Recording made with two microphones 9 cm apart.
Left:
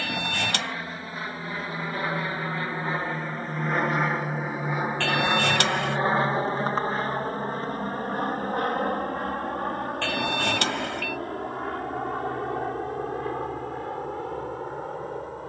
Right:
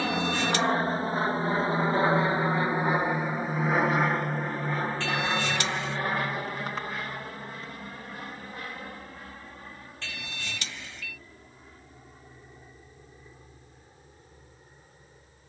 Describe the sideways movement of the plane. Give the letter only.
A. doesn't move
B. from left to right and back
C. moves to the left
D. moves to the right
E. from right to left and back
C.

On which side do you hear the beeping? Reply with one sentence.
In this clip you hear the beeping on the left.